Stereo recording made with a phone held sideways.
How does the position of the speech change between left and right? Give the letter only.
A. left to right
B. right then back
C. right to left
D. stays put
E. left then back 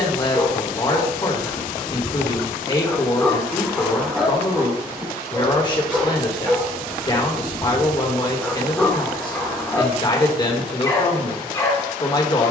D.